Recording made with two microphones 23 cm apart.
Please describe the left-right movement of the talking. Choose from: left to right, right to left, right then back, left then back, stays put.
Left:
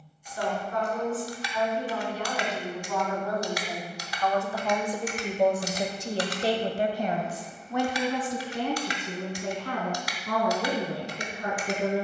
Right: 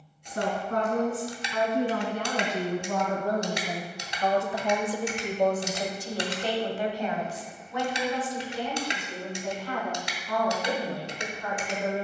right to left.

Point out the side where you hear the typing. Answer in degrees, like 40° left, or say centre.
20° right.